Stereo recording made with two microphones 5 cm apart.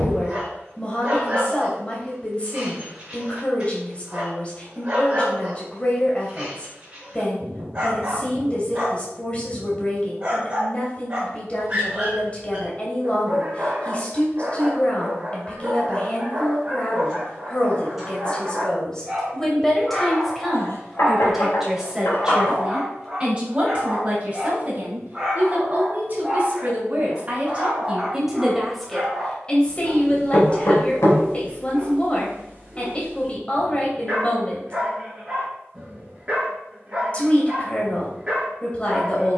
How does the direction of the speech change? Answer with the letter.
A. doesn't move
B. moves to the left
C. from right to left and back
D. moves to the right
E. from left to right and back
E.